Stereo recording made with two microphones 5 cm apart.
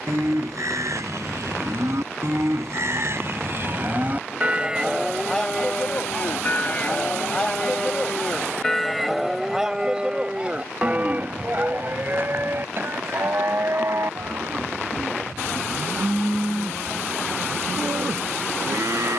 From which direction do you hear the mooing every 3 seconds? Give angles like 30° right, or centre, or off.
70° right, 20° right, 20° left, 20° right, 50° right, 70° right, 70° right.